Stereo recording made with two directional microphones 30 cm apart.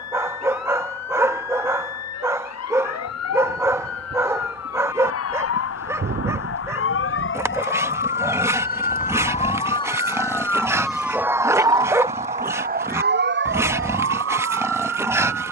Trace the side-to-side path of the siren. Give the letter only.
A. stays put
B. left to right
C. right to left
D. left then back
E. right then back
B.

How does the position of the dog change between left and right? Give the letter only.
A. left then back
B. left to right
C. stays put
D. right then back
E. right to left
C.